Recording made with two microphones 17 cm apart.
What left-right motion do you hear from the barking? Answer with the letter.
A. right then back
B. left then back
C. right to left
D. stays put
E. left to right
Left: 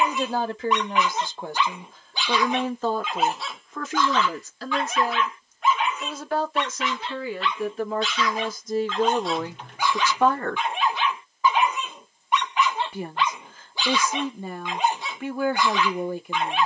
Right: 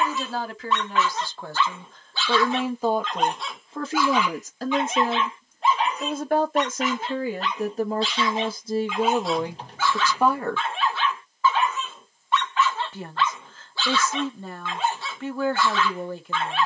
A.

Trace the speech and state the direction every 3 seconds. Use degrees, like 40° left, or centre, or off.
10° left, 40° right, 40° right, 20° right, 10° left, 10° left.